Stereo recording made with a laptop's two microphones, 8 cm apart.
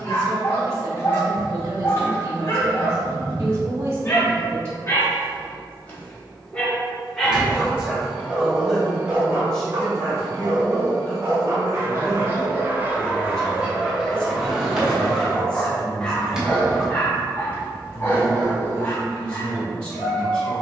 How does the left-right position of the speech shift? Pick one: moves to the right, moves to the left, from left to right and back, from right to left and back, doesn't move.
moves to the left.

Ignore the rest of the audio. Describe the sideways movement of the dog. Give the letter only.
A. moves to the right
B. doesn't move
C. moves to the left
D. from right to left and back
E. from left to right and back
E.